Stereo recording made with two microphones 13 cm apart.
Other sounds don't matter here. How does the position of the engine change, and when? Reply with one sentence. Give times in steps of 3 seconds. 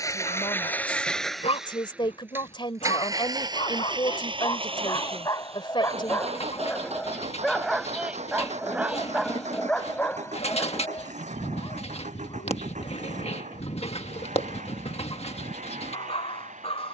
In this clip you hear the engine in the centre from 0 s and on the right from 3 s.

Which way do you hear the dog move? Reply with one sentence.
In this clip you hear the dog go right and come back.